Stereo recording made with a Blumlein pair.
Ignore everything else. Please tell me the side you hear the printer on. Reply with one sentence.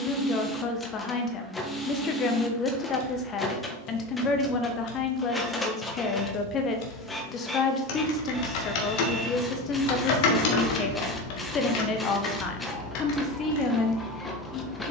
In this clip you hear the printer in the centre.